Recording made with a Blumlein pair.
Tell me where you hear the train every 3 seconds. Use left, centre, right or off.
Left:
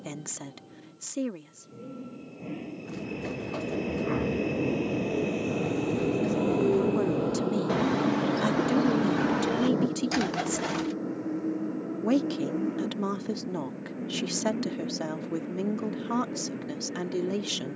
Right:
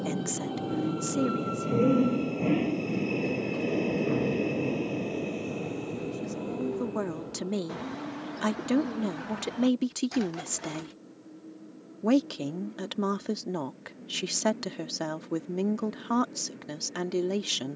right, centre, left, left, left, left.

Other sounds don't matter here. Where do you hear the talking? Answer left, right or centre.
centre.